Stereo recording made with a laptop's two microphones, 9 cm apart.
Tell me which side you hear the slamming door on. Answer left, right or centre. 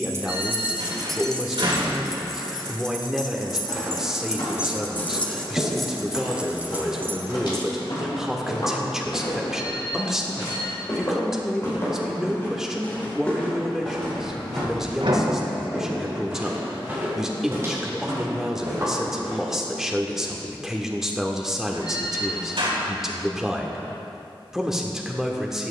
right.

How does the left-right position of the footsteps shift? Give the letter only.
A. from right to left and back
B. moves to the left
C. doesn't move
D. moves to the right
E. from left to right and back
D.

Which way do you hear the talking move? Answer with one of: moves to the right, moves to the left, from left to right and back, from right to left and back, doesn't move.
doesn't move.